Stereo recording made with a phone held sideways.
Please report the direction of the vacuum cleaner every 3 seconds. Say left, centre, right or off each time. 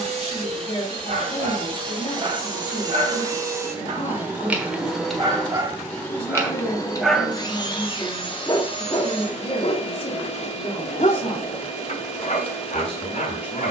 right, centre, left, left, left.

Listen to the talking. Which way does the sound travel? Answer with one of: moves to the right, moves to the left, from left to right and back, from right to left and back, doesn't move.
doesn't move.